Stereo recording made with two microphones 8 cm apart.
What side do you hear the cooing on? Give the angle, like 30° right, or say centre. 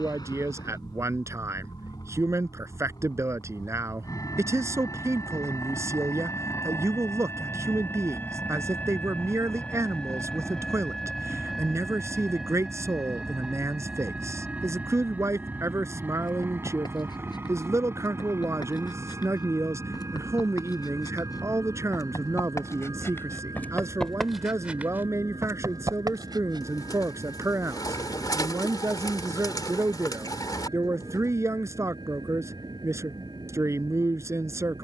50° left.